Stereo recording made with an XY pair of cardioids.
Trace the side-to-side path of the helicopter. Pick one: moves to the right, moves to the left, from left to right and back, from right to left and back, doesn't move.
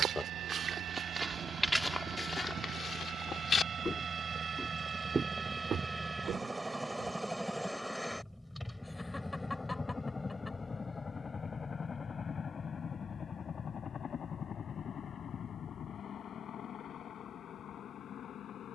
moves to the left.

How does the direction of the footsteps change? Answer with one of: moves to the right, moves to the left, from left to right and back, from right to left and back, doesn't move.
from right to left and back.